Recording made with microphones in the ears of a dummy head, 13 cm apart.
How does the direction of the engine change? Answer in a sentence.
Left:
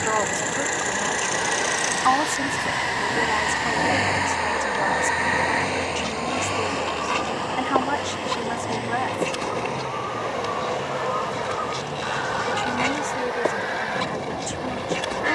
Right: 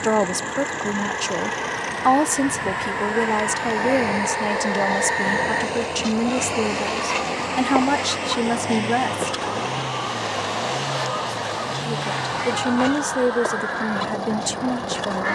You can hear the engine travel towards the right.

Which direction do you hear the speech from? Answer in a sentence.
You can hear the speech on the right.